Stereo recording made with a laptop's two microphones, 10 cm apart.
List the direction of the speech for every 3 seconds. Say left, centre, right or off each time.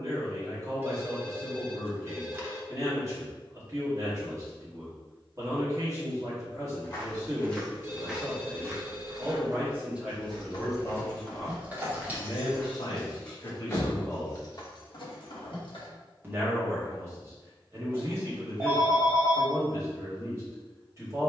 right, right, right, centre, left, right, right.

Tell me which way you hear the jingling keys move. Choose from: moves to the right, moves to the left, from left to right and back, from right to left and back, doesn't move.
from left to right and back.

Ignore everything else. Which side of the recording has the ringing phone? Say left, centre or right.
right.